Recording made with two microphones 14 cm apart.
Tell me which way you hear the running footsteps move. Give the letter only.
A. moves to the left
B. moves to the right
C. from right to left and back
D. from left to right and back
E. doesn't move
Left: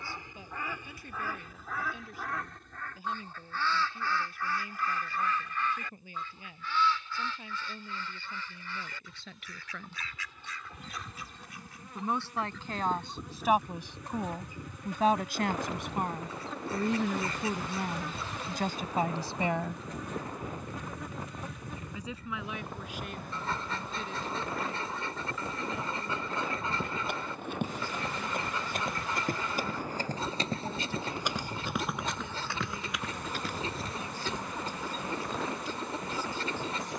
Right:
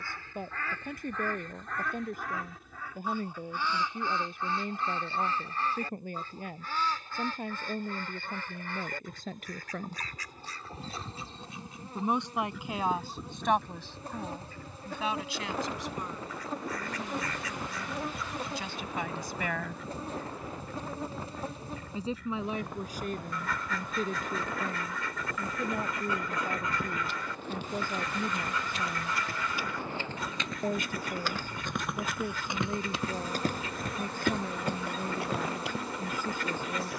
B.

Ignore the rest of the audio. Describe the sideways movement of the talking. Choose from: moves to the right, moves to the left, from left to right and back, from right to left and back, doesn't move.
from right to left and back.